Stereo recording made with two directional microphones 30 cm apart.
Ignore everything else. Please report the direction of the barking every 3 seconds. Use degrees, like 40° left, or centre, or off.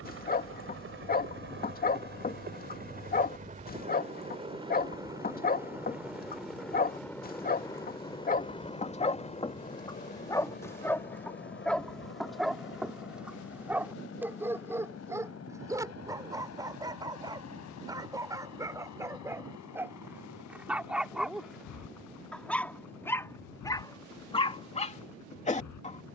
30° left, 30° left, 30° left, 10° left, centre, 10° right, 10° right, centre, 20° left.